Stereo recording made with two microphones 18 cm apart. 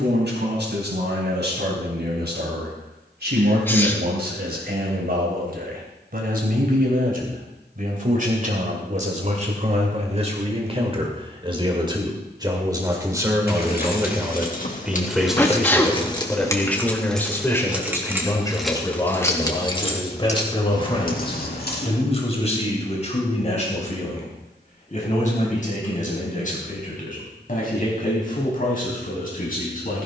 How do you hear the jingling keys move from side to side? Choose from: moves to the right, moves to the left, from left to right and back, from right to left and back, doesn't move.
from left to right and back.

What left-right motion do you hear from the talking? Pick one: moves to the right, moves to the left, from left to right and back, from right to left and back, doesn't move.
moves to the left.